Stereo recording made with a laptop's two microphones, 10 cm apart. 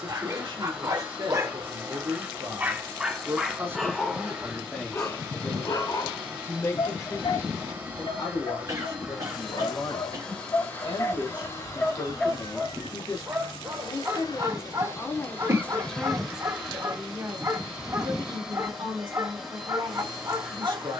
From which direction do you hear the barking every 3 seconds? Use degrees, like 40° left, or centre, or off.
30° right, 10° left, 60° left, 40° left, 20° right, 30° right, 30° right.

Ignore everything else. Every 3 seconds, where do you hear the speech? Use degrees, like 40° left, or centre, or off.
50° right, 10° right, 40° left, 50° left, 40° left, 10° right, 50° right.